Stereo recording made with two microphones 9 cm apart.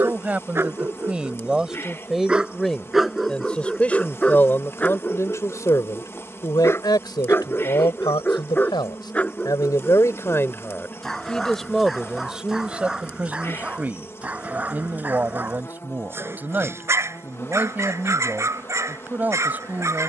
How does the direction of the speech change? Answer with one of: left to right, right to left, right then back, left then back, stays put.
left then back.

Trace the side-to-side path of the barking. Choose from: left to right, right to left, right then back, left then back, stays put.
left then back.